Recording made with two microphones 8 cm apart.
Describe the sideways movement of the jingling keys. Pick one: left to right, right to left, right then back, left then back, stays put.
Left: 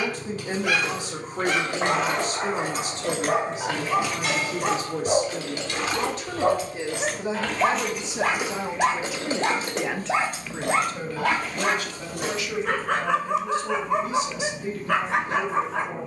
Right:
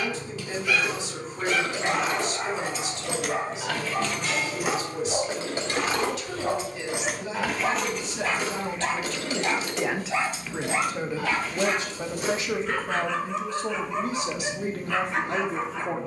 right then back.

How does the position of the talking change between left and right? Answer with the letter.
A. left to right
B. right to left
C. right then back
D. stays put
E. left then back
A.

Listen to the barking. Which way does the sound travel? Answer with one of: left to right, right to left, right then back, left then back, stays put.
stays put.